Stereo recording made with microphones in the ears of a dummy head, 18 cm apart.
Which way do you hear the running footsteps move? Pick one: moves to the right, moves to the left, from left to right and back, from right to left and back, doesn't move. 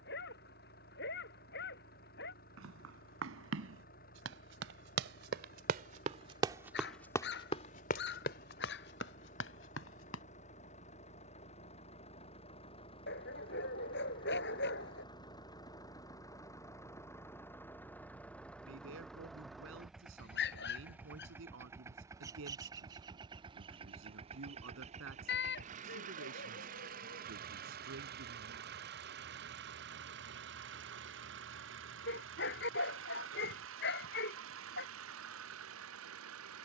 moves to the left.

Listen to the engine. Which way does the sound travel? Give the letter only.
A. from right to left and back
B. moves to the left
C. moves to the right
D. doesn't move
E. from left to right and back
C.